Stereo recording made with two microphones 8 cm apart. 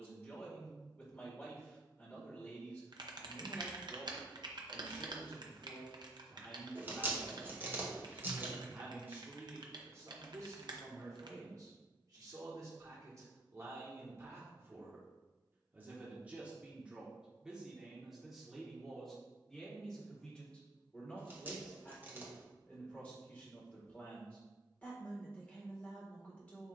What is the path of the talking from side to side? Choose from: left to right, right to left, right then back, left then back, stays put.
right then back.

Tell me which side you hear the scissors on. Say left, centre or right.
right.